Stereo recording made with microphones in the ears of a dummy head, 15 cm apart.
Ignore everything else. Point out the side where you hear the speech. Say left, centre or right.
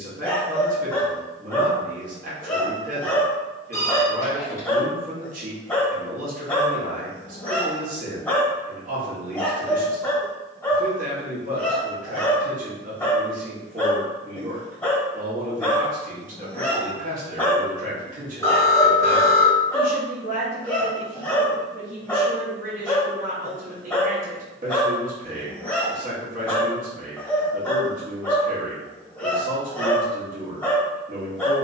right.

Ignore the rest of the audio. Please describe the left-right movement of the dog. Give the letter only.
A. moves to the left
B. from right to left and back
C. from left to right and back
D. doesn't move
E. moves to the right
D.